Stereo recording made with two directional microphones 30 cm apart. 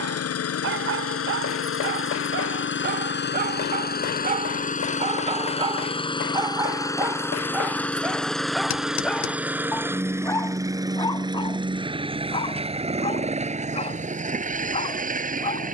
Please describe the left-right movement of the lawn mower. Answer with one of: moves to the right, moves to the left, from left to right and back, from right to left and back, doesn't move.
moves to the right.